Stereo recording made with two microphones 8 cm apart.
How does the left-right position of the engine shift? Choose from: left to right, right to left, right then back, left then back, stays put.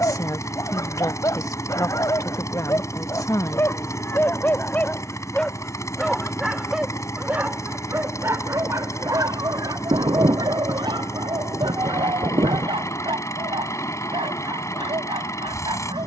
stays put.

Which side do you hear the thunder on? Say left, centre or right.
right.